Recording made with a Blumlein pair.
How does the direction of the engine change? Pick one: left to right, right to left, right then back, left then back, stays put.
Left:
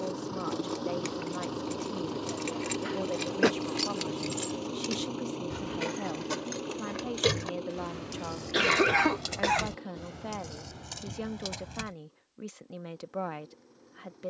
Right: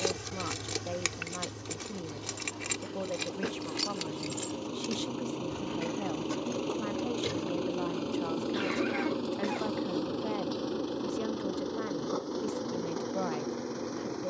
left to right.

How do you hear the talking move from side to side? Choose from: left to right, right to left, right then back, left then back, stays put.
stays put.